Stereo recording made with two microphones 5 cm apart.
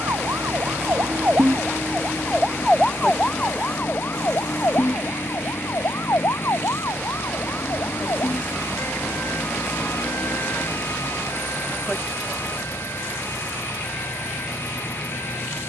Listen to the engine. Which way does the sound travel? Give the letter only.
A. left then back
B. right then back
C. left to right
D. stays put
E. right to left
D.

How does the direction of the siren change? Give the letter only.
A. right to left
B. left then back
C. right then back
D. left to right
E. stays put
A.